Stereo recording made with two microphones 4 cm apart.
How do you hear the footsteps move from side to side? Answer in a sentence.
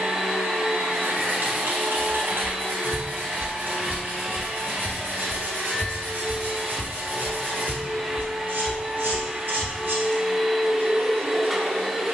You can hear the footsteps go right and come back.